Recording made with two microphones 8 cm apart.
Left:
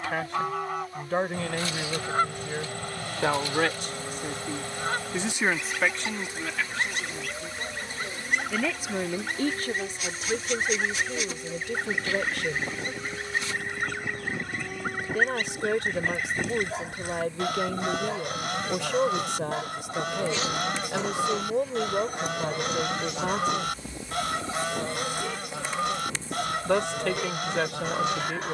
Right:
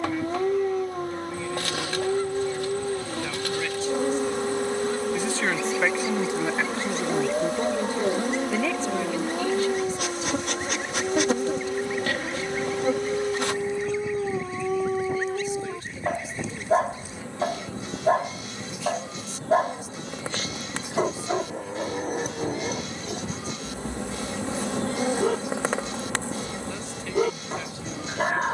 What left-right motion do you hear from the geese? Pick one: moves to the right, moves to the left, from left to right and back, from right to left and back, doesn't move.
doesn't move.